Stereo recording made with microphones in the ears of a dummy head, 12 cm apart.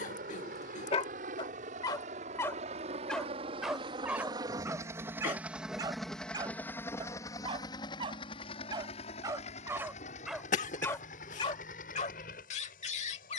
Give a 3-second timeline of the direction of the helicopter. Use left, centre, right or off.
right, right, left, left, left.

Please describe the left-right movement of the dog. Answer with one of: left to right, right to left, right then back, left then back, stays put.
right then back.